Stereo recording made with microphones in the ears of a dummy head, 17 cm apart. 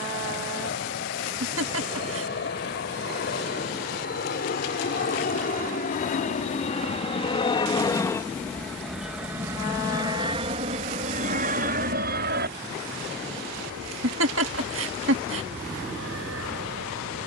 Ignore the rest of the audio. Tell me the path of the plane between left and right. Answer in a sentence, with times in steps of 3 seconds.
You can hear the plane on the left from 0 s and on the right from 9 s.